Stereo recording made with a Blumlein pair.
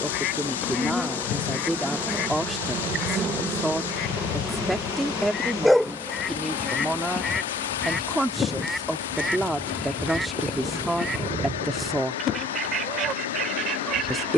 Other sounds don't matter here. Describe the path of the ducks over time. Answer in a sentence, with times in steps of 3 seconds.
In this clip you hear the ducks on the left from 0 s, in the centre from 6 s and on the right from 12 s.